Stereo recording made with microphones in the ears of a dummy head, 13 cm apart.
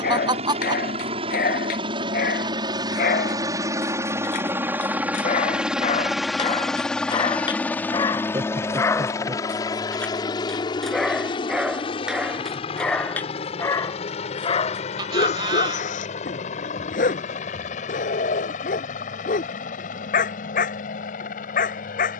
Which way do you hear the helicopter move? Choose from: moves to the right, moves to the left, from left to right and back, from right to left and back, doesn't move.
moves to the left.